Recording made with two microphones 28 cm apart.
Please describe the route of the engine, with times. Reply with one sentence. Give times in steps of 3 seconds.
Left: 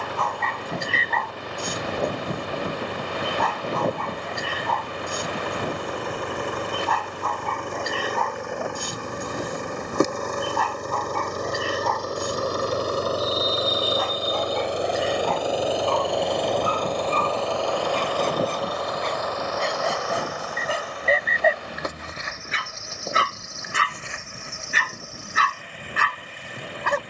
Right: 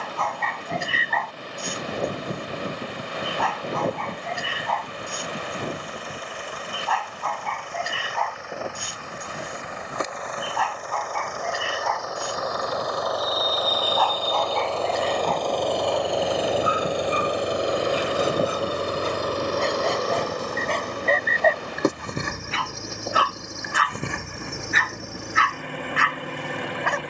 You can hear the engine on the left from 0 s, in the centre from 15 s and on the right from 18 s.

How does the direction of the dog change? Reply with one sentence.
In this clip you hear the dog go right and come back.